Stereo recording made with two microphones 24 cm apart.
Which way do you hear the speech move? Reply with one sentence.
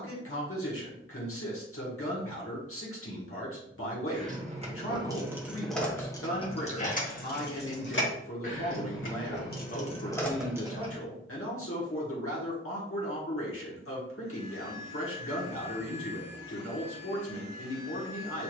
In this clip you hear the speech stay put.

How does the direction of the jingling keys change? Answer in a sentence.
In this clip you hear the jingling keys move from right to left and back again.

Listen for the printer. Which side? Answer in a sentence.
In this clip you hear the printer on the right.